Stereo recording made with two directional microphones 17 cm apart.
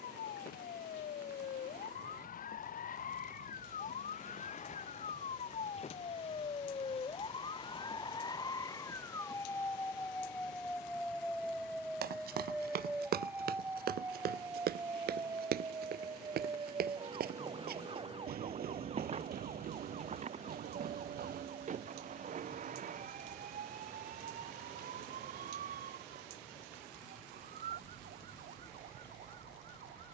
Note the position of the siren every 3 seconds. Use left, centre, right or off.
left, left, left, centre, centre, right, right, right, right, right.